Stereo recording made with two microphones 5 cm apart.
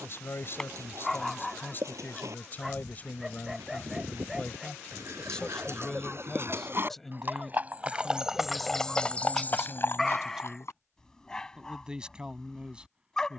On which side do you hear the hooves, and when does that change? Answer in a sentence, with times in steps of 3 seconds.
In this clip you hear the hooves on the right from 0 s, on the left from 9 s and not at all from 12 s.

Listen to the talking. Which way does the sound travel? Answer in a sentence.
You can hear the talking move to the right.